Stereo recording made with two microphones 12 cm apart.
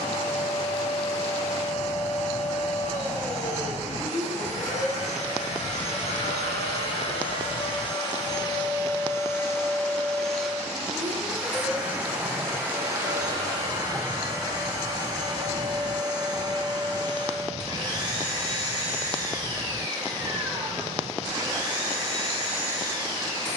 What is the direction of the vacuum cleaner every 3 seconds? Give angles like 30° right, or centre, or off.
70° left, 70° left, 50° left, centre, 30° right, 30° right, 30° right, 30° right.